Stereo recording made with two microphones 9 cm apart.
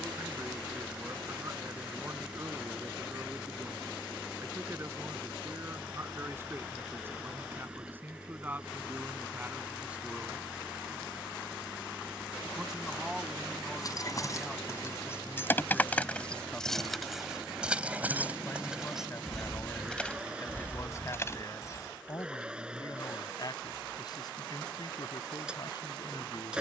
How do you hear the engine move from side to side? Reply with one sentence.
In this clip you hear the engine stay put.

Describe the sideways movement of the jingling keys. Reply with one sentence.
You can hear the jingling keys move from left to right and back again.